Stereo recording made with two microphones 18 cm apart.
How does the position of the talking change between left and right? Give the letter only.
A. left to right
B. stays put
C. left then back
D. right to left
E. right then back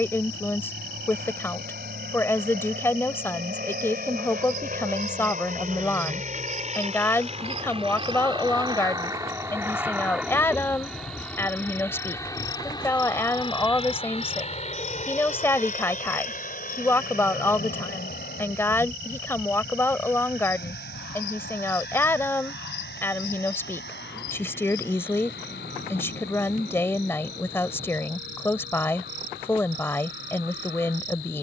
B.